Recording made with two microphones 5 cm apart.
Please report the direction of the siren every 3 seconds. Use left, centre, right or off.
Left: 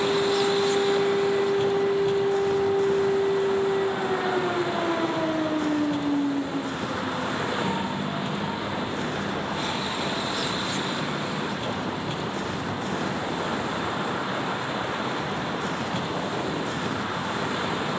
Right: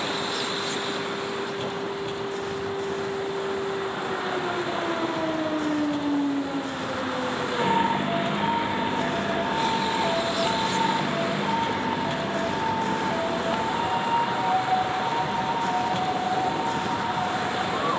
left, centre, right, right, right, right.